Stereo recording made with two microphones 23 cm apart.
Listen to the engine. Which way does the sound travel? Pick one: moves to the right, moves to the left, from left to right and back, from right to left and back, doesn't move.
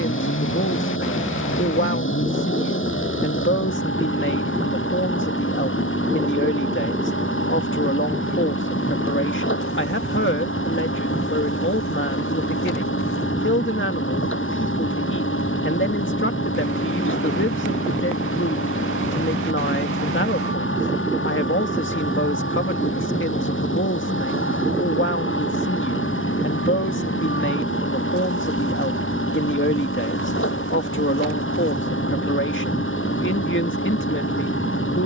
doesn't move.